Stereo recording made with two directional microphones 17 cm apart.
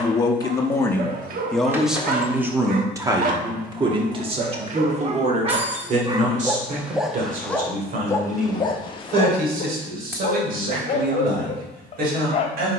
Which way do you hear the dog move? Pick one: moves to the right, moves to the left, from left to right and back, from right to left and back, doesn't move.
moves to the left.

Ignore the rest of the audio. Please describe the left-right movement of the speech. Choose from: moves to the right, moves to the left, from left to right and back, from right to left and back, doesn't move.
moves to the right.